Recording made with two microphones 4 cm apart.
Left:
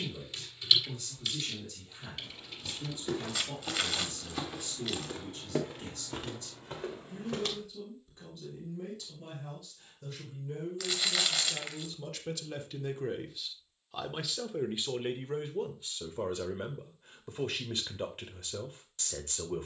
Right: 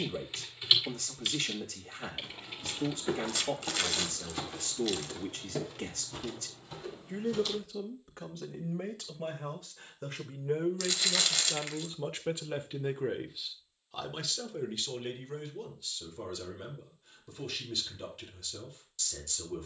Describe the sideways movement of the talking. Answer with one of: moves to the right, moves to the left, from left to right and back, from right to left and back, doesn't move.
moves to the left.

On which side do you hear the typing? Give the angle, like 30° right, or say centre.
20° right.